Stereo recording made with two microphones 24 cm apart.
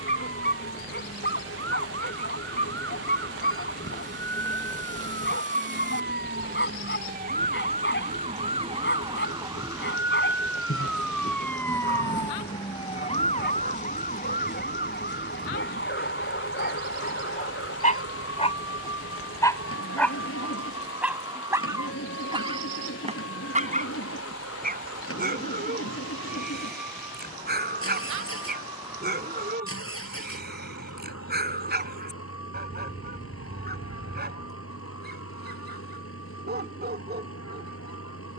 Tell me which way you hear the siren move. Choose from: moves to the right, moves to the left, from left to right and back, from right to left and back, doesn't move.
moves to the left.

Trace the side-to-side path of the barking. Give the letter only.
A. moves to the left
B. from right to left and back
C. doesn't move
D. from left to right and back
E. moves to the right
E.